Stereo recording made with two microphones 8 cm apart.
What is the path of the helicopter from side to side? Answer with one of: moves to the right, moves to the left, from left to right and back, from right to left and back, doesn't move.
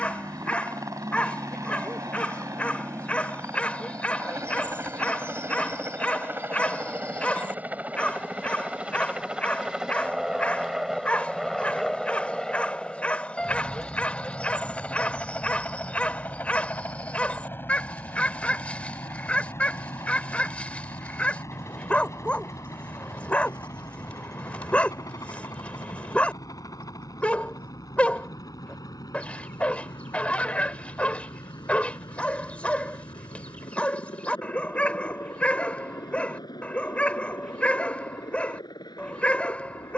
moves to the left.